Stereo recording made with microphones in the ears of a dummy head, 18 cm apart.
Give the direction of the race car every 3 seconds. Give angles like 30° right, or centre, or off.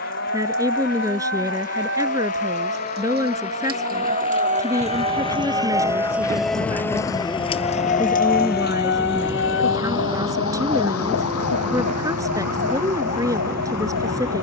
40° left, 30° left, centre, 20° right, 40° right.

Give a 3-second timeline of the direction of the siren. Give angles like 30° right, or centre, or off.
60° right, 30° right, 20° left, 70° left, 80° left.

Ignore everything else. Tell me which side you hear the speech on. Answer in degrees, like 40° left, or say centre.
20° right.